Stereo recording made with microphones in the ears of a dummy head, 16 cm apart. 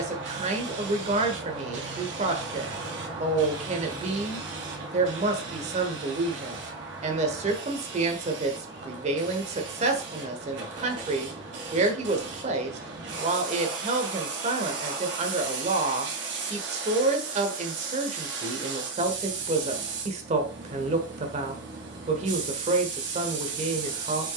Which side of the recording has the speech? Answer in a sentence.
In this clip you hear the speech on the right.